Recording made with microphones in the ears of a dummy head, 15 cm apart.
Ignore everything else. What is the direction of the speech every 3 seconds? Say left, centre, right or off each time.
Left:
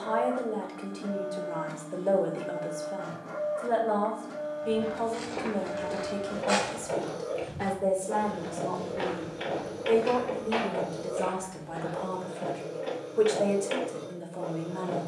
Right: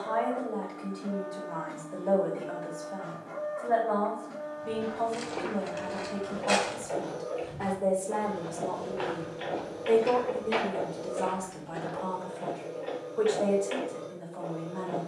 left, left, centre, centre, left.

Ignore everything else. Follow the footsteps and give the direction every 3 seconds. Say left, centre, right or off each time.
off, centre, left, centre, off.